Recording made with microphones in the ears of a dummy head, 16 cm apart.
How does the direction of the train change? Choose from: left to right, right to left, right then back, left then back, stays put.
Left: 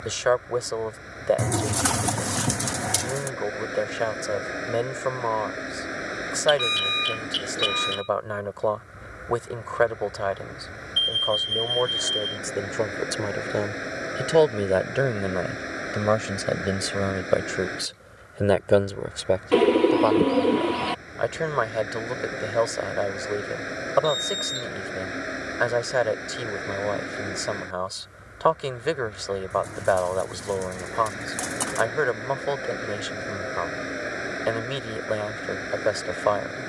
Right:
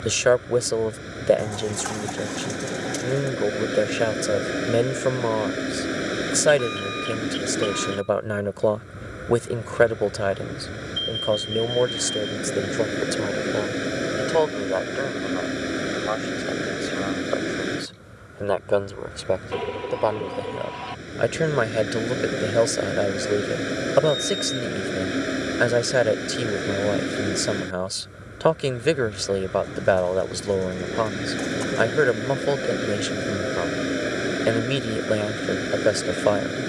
stays put.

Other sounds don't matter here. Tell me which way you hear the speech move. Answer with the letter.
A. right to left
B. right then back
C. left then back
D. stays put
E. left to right
C.